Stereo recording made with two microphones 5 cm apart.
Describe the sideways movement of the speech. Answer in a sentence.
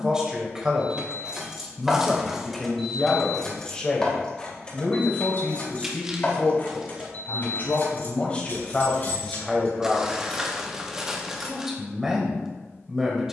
In this clip you hear the speech move from right to left and back again.